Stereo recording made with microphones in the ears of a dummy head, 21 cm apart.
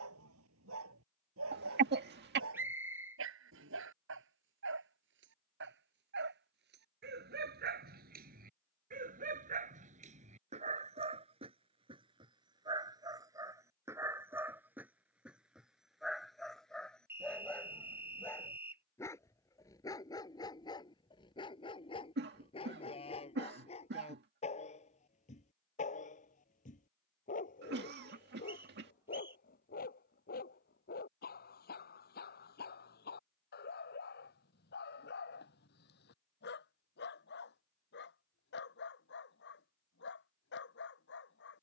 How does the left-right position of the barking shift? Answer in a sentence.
In this clip you hear the barking move to the left.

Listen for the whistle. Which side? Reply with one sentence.
In this clip you hear the whistle in the centre.